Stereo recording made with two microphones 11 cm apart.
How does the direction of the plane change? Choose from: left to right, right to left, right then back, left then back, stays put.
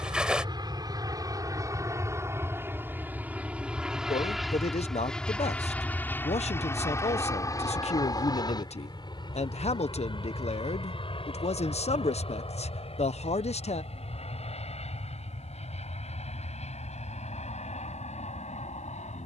right to left.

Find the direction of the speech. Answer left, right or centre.
left.